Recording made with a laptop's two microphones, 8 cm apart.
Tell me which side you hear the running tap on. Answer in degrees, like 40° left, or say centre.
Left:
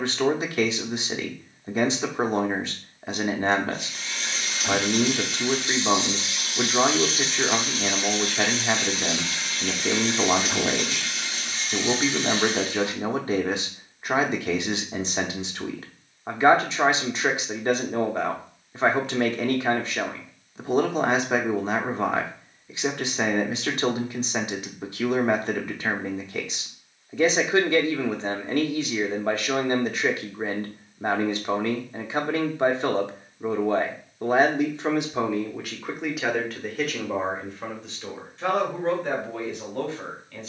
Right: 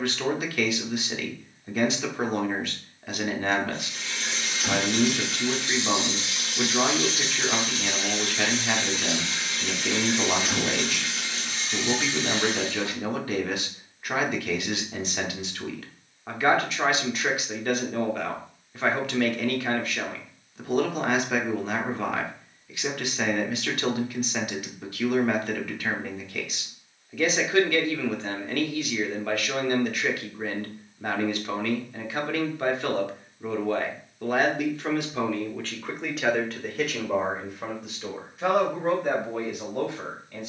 30° right.